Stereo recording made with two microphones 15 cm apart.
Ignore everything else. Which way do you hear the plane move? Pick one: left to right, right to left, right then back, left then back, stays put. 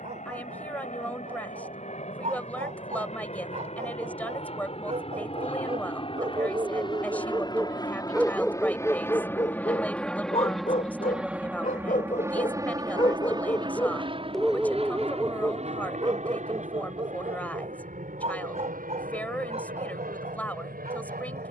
left to right.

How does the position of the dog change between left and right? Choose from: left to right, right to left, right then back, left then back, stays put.
left then back.